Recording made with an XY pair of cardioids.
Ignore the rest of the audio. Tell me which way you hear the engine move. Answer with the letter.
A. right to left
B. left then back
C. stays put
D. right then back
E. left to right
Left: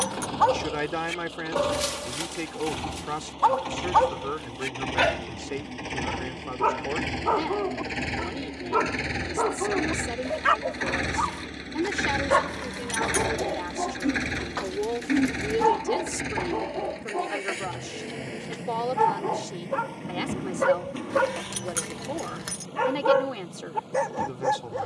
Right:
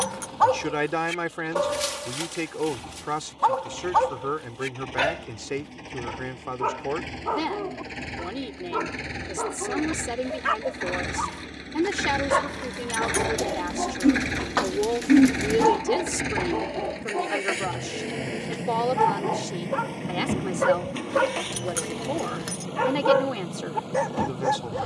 E.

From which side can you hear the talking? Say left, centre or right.
right.